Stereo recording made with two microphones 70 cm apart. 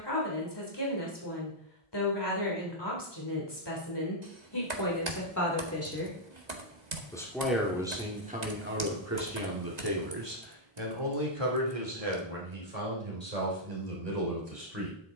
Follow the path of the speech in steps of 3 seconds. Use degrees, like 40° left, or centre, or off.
40° left, 30° left, 10° right, 40° right, 60° right.